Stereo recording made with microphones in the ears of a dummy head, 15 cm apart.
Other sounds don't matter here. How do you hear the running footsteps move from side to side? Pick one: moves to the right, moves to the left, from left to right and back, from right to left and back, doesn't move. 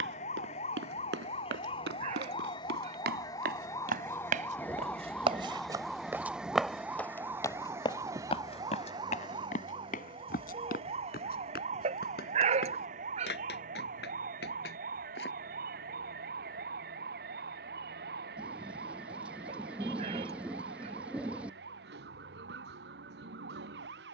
moves to the left.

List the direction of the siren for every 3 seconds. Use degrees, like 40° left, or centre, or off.
30° left, 10° left, 10° right, 30° right, 50° right, 60° right, 60° right, 70° right.